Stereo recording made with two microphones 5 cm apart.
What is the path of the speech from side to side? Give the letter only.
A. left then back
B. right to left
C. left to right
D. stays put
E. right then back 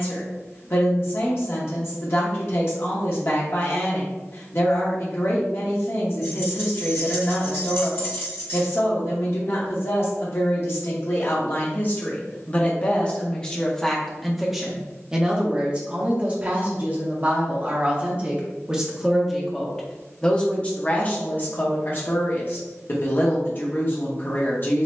E.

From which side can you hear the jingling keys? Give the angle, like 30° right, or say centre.
60° left.